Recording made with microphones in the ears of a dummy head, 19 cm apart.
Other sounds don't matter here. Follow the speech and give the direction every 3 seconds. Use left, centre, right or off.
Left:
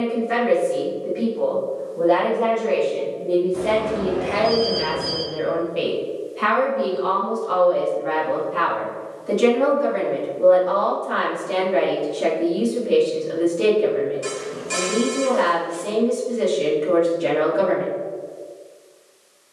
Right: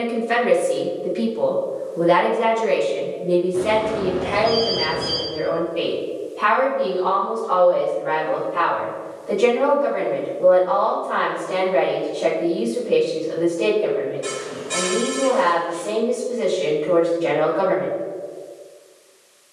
right, centre, left, left, left, left, off.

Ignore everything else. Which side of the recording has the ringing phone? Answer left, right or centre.
left.